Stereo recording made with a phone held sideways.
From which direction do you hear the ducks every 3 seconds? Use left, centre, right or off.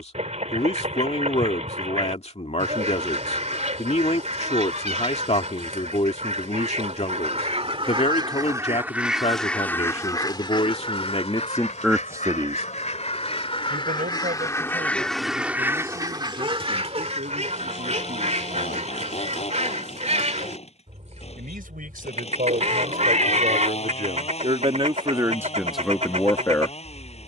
right, right, right, left, left, right, right, right, right.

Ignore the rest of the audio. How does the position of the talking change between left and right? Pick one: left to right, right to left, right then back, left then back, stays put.
right then back.